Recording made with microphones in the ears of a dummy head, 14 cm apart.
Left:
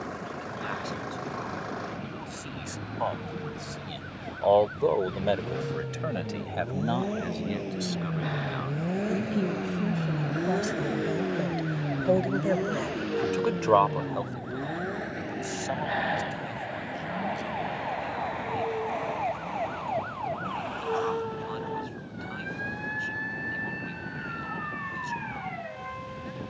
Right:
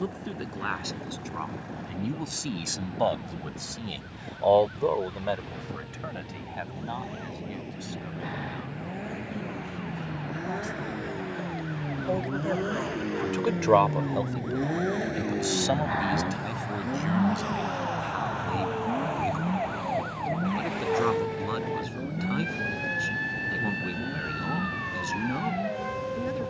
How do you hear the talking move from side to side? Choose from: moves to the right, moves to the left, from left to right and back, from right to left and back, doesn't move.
from right to left and back.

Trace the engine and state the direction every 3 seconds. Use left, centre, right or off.
left, left, left, left, centre, right, right, right, right.